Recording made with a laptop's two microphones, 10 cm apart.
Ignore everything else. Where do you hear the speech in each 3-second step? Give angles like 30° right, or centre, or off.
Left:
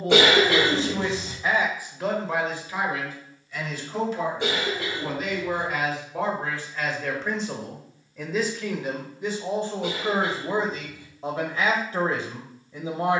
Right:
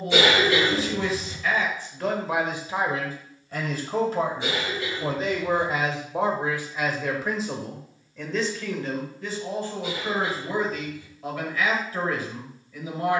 10° left, 30° right, centre, 20° left, 30° left.